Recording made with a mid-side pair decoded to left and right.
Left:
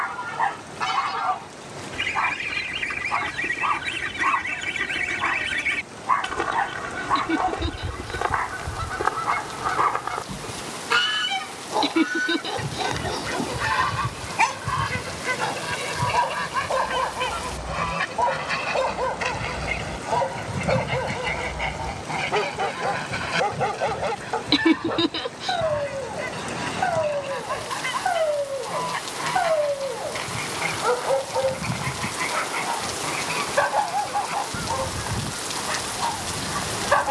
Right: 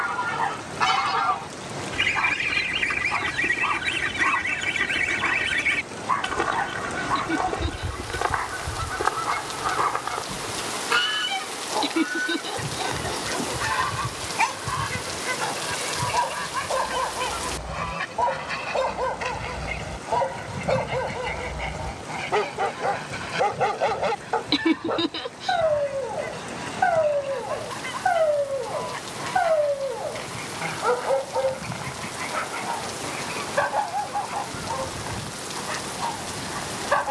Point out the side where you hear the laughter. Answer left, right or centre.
left.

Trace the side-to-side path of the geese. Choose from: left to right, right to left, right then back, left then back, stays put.
right to left.